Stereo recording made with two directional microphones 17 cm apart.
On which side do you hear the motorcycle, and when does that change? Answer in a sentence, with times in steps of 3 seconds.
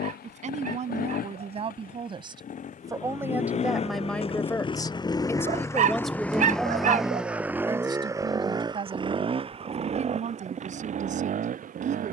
You can hear the motorcycle on the left from 0 s, in the centre from 6 s and on the right from 9 s.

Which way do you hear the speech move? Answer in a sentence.
In this clip you hear the speech go left and come back.